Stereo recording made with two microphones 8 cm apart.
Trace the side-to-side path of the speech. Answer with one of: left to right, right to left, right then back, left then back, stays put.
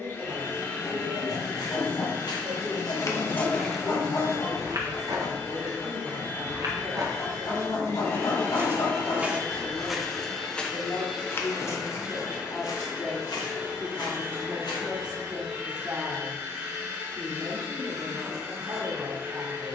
left then back.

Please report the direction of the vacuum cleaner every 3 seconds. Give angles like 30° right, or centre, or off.
30° left, 30° left, 30° left, 10° left, 20° right, 30° right, 30° right.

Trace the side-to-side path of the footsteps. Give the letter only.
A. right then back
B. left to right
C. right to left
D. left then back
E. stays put
A.